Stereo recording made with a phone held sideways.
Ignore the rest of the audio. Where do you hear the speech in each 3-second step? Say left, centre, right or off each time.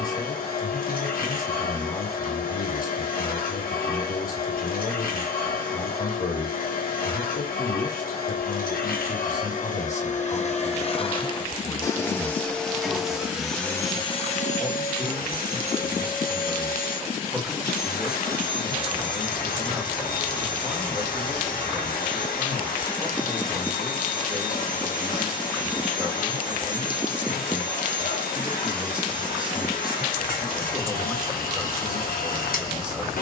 left, left, left, left, centre, centre, centre, centre, centre, centre, centre.